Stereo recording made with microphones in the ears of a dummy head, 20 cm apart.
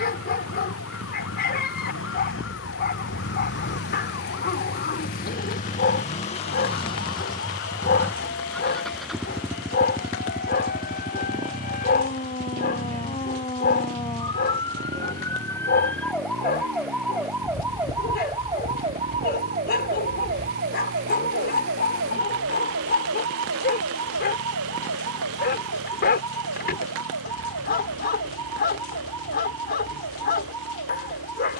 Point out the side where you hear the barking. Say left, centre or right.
left.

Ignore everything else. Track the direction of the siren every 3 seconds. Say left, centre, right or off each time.
left, left, left, left, left, centre, right, right, right, right, right.